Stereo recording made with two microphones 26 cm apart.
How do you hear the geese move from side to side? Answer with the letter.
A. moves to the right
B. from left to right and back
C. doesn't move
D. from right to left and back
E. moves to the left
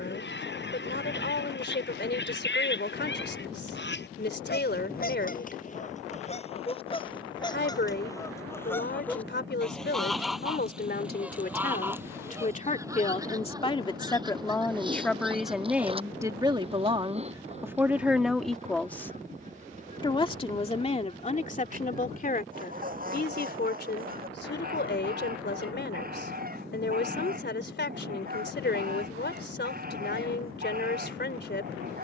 A.